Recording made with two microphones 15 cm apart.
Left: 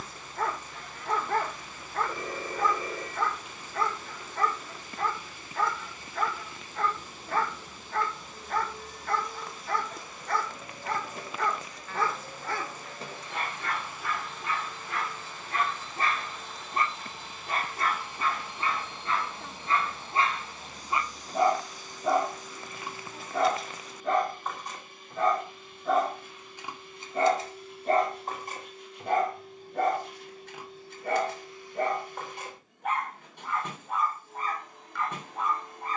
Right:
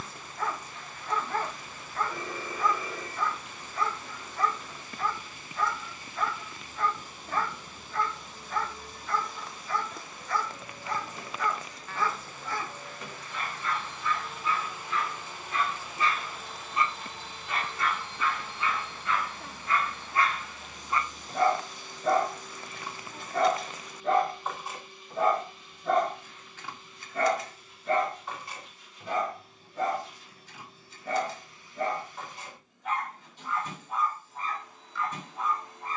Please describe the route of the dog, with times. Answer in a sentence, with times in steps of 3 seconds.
You can hear the dog on the left from 0 s, in the centre from 21 s and on the left from 27 s.